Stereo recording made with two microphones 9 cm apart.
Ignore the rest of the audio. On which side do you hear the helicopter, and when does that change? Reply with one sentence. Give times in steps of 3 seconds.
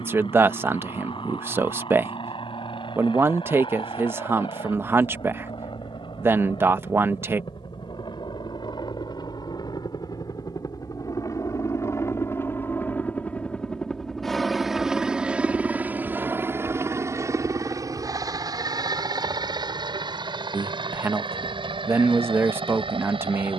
You can hear the helicopter on the left from 0 s, in the centre from 12 s and on the right from 15 s.